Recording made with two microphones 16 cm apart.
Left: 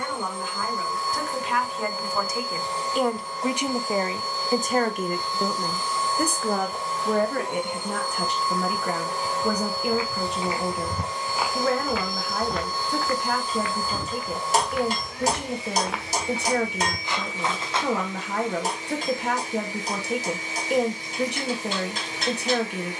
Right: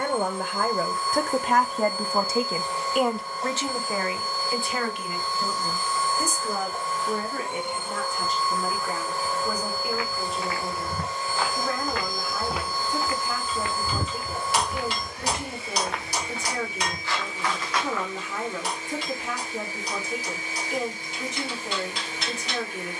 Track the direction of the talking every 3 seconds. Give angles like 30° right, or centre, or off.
40° right, 30° left, 70° left, 70° left, 70° left, 70° left, 70° left, 70° left.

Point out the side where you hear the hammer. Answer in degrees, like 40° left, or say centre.
40° left.